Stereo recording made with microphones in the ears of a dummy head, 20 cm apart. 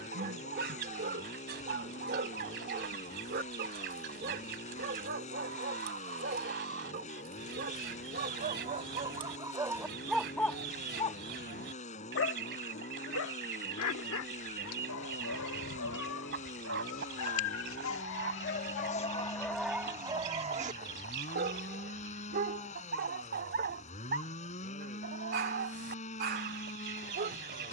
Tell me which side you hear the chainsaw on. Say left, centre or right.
left.